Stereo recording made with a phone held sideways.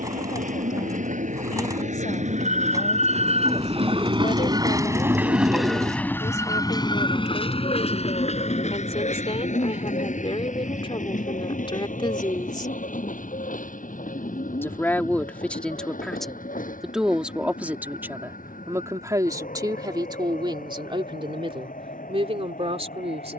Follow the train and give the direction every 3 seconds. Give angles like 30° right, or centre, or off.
70° right, 30° right, 40° left, 70° left, 70° left, 80° left, 80° left, 80° left.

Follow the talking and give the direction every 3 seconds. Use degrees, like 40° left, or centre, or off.
60° left, 60° left, 50° left, 40° left, 30° left, centre, 30° right, 50° right.